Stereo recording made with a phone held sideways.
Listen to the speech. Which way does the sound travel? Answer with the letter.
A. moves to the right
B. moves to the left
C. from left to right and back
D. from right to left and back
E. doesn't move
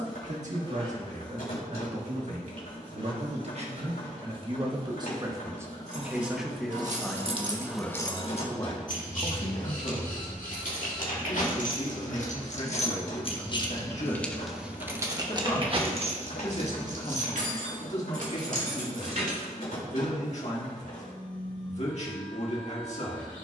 B.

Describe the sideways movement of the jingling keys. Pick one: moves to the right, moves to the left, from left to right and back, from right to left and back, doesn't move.
from right to left and back.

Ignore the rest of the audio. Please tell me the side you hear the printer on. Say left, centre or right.
left.